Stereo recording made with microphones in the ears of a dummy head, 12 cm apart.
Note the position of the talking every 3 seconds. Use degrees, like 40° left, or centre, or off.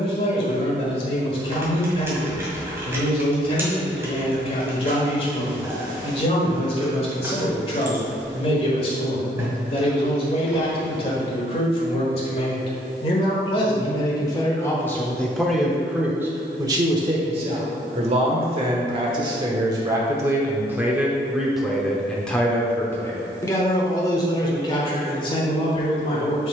50° left, 50° left, 50° left, 50° left, 40° left, 20° right, 30° right, 10° left, 40° left.